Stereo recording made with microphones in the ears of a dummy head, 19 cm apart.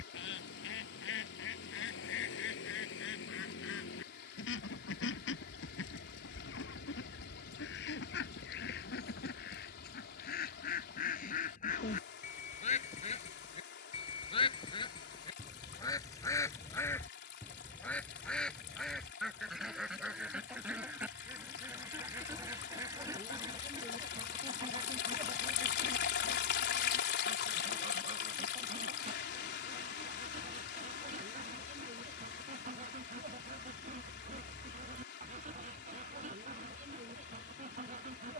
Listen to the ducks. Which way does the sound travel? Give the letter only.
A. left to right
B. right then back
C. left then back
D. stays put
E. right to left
A.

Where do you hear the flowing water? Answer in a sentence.
In this clip you hear the flowing water on the left.